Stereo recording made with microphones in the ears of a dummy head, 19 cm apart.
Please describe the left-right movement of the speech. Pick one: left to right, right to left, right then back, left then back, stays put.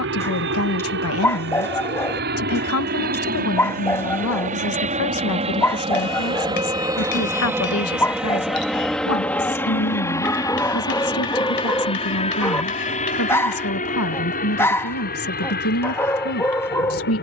stays put.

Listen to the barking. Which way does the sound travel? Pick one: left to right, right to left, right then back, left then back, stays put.
stays put.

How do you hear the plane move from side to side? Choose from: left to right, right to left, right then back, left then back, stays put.
right to left.